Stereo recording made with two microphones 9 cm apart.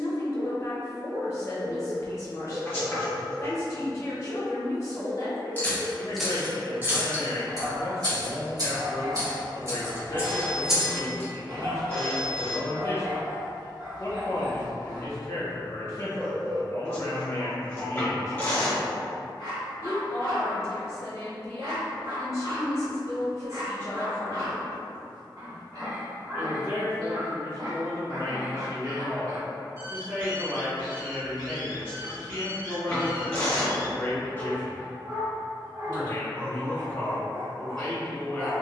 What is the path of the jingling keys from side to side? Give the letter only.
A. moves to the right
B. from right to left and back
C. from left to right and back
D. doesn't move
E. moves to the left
C.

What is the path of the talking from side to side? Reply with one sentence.
You can hear the talking go right and come back.